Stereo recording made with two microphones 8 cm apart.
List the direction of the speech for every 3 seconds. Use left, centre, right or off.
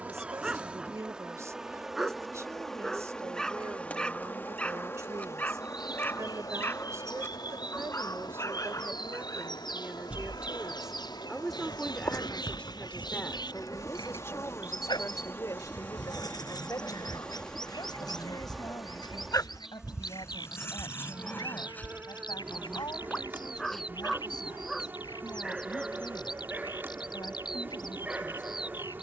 right, right, right, centre, left, left, left, left, left, left.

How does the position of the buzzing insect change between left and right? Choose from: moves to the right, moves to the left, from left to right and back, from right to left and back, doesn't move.
from right to left and back.